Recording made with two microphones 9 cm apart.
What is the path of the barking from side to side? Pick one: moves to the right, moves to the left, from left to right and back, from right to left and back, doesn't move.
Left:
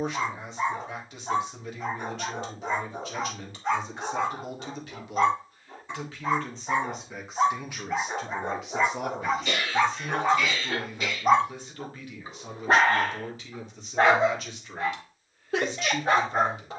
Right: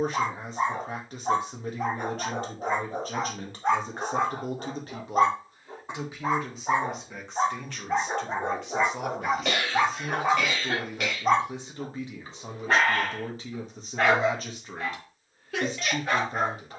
moves to the left.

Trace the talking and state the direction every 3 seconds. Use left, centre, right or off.
right, right, centre, centre, right, right.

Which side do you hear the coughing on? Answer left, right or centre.
right.